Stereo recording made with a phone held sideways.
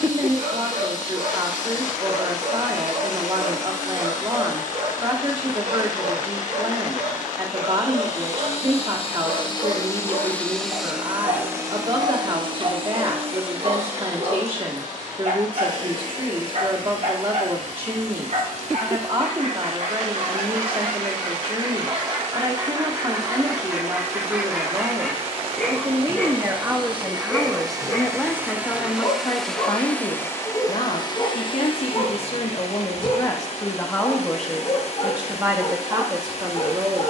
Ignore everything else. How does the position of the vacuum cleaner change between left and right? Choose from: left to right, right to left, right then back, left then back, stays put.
right then back.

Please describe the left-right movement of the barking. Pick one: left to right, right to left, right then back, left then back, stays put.
right to left.